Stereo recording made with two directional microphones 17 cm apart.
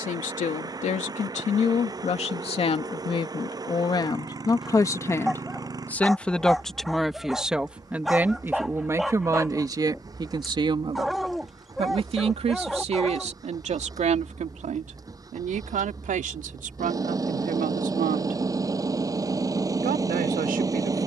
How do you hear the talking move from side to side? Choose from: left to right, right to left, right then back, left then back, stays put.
left to right.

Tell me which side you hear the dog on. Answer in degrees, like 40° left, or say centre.
centre.